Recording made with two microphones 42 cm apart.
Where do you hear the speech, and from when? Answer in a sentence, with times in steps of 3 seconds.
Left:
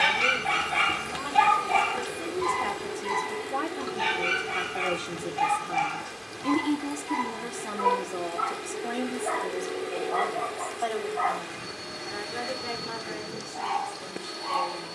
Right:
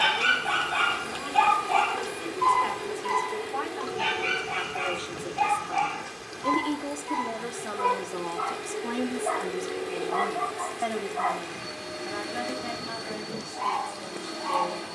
You can hear the speech on the left from 0 s, in the centre from 6 s and on the right from 9 s.